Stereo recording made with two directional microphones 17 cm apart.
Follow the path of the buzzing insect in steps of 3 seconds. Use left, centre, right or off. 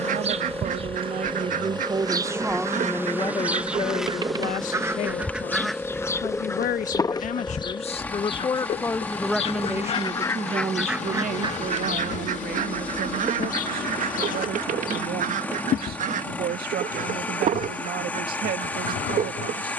right, centre, left, left, left, left, left.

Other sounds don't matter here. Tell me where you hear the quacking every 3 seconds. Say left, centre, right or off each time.
right, right, left, centre, right, right, right.